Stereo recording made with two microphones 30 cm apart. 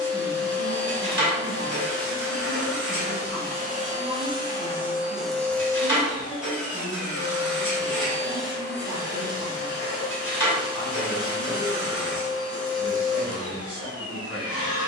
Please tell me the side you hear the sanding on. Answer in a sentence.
You can hear the sanding on the left.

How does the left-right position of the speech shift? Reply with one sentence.
In this clip you hear the speech go right and come back.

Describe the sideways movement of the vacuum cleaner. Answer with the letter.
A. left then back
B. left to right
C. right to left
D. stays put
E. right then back
C.